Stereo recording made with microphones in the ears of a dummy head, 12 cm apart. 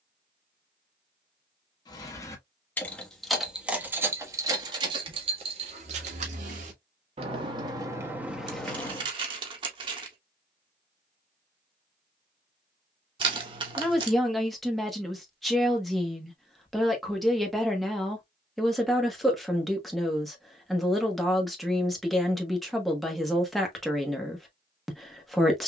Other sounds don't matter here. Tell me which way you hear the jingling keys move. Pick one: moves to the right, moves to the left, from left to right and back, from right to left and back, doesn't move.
from left to right and back.